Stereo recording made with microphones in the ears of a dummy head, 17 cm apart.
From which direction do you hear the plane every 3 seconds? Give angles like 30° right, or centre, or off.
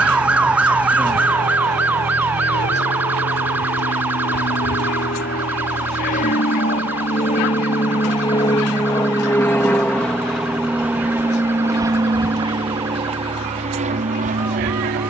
70° left, 50° left, 30° left, centre, 30° right.